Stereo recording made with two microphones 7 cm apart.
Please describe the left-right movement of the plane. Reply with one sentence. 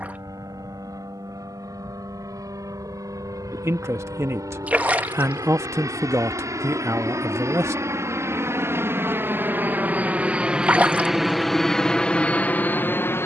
You can hear the plane travel towards the left.